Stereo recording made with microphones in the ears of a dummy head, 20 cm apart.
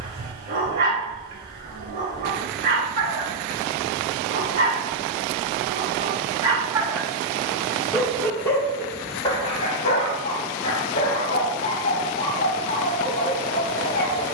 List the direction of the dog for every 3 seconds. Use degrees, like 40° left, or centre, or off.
40° right, 30° right, 10° right, 30° left, 30° left.